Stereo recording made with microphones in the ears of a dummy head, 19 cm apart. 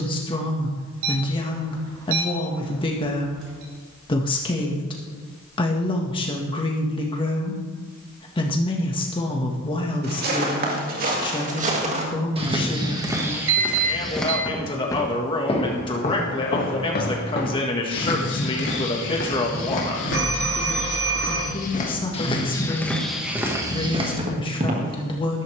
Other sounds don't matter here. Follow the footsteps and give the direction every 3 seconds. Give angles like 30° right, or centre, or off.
off, off, off, 40° right, 10° right, 40° left, 60° left, 20° left, 40° right.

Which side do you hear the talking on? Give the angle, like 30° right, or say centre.
20° left.